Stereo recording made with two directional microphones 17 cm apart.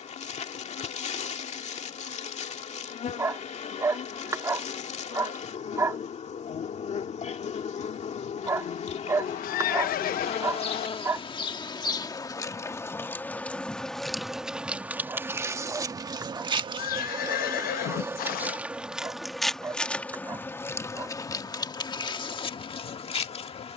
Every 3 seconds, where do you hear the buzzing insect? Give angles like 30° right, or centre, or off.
40° left, 40° left, 40° left, 40° left, 10° left, 20° right, centre, 30° left.